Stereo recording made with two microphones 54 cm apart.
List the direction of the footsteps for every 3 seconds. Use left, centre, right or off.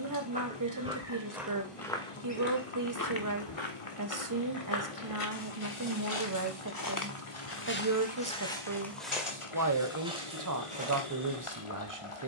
centre, left, left, centre.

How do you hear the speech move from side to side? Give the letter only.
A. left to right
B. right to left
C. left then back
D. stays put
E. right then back
D.